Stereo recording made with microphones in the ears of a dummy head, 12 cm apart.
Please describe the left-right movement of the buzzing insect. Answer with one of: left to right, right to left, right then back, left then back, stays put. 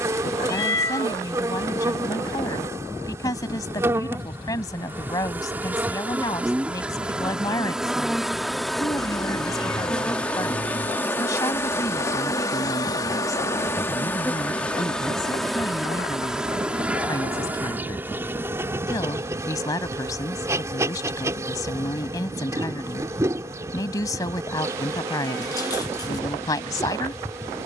left then back.